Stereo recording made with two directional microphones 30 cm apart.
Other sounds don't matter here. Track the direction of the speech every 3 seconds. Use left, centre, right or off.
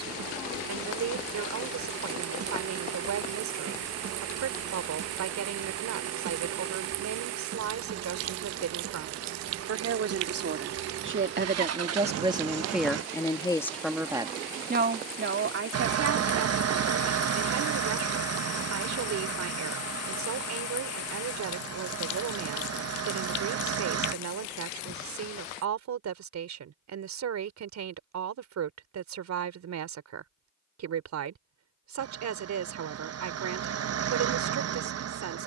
right, right, right, right, centre, right, right, right, right, right, right, right.